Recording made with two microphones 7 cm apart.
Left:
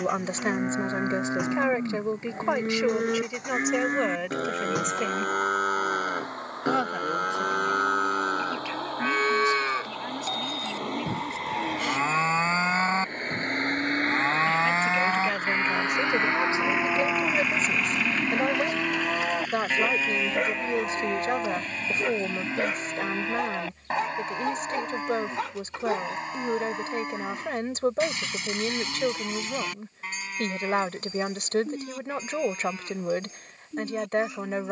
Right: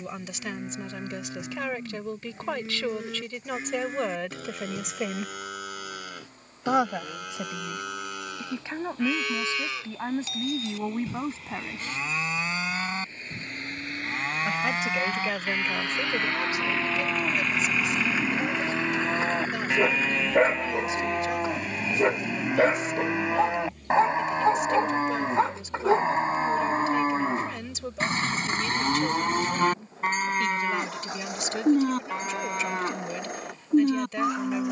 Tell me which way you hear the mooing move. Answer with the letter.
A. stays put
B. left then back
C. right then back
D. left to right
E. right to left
D.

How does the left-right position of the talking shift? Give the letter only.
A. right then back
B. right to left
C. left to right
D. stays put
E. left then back
A.